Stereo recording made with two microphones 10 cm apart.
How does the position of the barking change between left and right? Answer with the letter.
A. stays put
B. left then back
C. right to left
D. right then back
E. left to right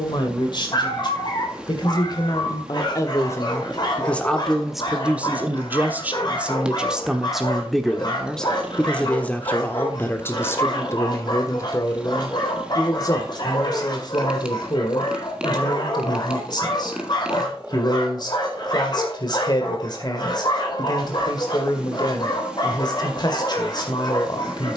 A.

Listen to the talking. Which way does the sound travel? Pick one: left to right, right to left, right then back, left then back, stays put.
right then back.